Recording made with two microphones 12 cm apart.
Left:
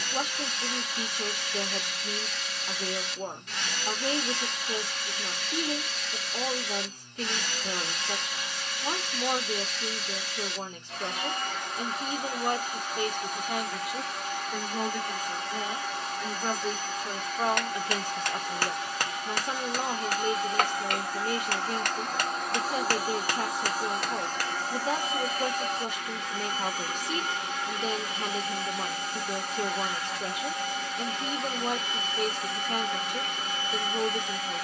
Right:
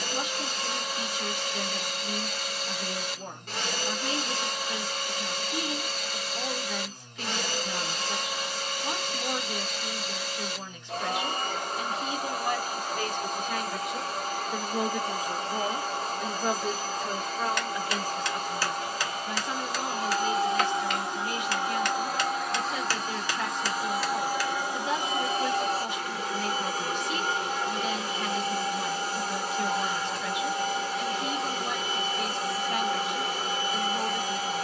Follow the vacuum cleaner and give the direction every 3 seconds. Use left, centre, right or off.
right, right, right, right, right, right, right, centre, right, right, right, right.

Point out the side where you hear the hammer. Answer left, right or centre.
left.